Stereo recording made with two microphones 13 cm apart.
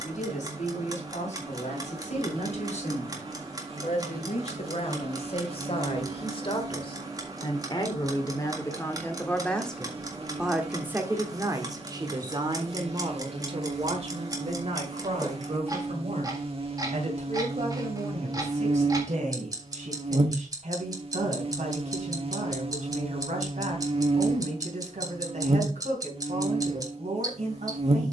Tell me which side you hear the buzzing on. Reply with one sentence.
In this clip you hear the buzzing on the right.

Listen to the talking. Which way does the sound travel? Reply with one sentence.
In this clip you hear the talking move from left to right.